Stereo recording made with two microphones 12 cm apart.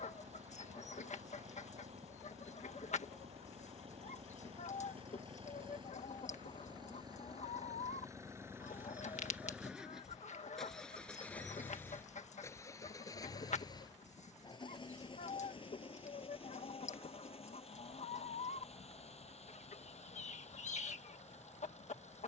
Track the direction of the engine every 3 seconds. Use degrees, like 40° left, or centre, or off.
60° right, 50° right, 30° right, centre, 30° left, 50° left, 60° left, 60° left.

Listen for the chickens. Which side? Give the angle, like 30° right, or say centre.
70° left.